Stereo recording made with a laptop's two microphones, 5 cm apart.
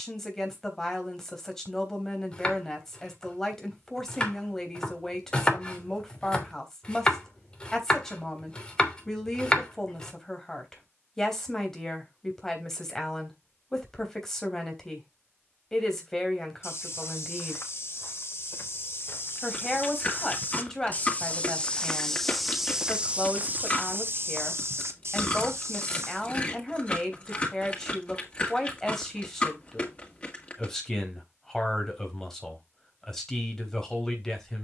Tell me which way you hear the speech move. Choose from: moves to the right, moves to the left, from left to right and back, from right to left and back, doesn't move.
doesn't move.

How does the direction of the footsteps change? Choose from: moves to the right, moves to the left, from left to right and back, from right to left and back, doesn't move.
moves to the right.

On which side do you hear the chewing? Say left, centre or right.
left.